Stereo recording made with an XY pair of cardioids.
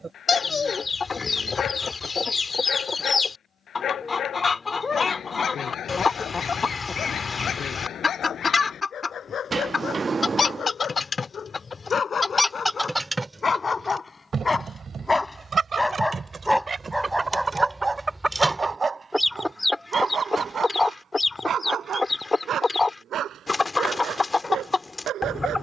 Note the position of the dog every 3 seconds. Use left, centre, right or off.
left, left, left, left, left, centre, right, right, right.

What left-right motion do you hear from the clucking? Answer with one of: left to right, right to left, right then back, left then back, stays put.
right then back.